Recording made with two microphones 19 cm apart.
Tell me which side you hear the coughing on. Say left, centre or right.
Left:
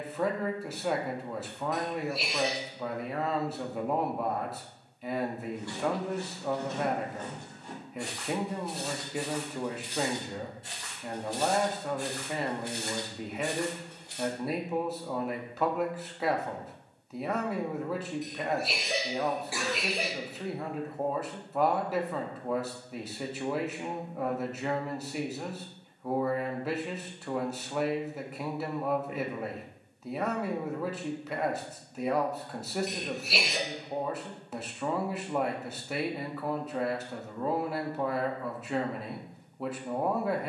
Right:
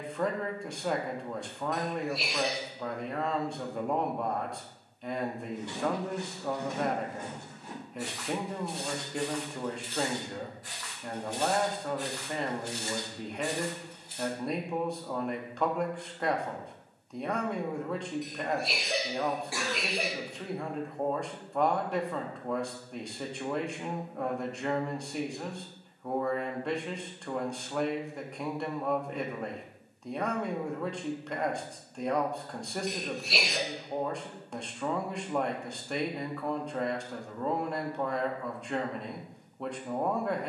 centre.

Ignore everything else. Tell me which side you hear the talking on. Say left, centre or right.
centre.